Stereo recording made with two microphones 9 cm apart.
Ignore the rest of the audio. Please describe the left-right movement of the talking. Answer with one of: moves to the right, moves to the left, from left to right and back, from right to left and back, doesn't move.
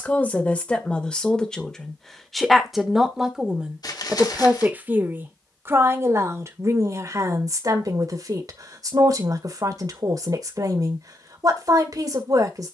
moves to the right.